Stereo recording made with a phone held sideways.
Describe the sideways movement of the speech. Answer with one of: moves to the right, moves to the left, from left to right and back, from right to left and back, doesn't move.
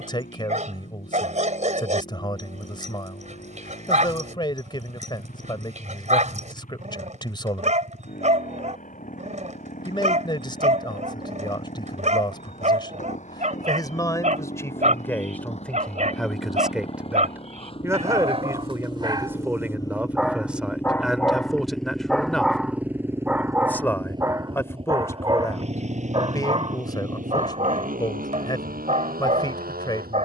from left to right and back.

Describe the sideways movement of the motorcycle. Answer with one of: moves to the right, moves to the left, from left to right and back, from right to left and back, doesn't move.
moves to the right.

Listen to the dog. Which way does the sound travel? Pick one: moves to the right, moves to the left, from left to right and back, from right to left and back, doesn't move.
from right to left and back.